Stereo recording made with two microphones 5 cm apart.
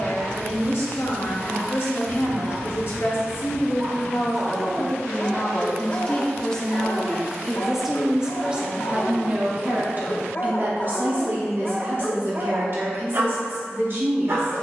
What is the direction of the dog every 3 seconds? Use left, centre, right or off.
right, centre, left, left, right.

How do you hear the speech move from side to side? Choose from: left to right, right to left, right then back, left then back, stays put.
left to right.